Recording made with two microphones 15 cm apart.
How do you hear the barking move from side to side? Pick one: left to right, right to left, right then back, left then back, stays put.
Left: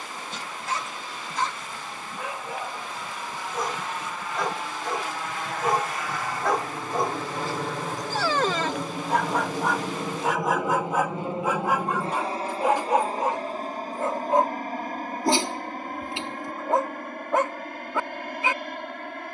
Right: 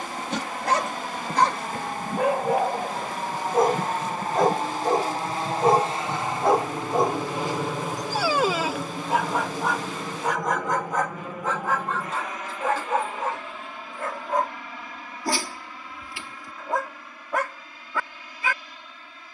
right to left.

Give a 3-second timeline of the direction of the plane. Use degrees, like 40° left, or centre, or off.
60° right, 40° right, 10° right, 20° left, 40° left, 50° left, 50° left.